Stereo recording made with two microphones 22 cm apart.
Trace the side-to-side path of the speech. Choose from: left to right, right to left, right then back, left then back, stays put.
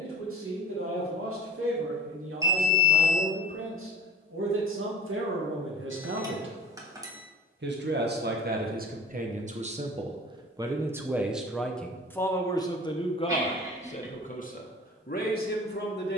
right to left.